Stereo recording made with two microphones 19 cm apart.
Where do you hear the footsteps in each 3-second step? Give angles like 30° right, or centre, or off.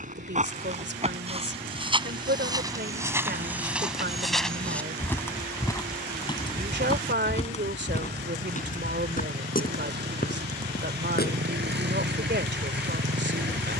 30° right, centre, 30° left, 50° left, off.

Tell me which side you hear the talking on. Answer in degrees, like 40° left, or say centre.
70° right.